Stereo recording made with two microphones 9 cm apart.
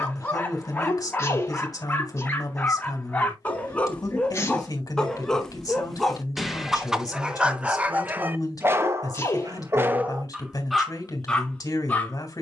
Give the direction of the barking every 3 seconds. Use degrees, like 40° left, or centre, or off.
20° left, 10° left, 10° right, 10° right.